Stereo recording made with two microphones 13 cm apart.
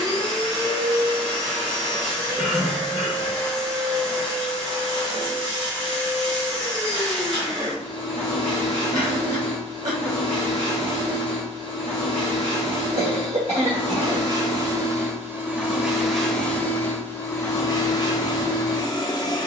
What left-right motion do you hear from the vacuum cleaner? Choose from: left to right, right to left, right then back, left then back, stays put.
right to left.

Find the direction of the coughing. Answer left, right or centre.
right.